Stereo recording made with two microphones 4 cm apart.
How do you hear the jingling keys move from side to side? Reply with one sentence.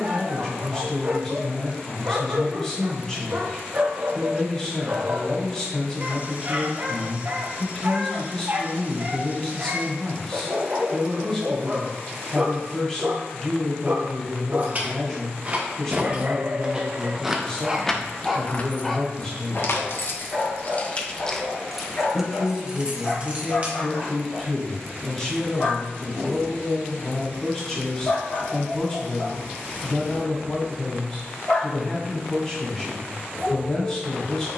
You can hear the jingling keys go left and come back.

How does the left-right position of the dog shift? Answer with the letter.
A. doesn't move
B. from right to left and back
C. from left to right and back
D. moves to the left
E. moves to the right
D.